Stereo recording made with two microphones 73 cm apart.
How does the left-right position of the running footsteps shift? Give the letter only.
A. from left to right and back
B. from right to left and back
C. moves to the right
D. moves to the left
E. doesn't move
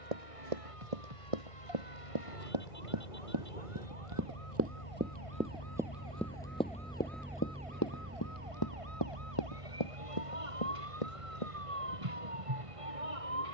D.